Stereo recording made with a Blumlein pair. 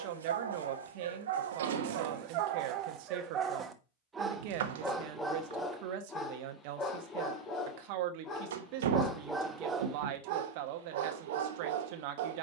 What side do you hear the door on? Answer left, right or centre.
right.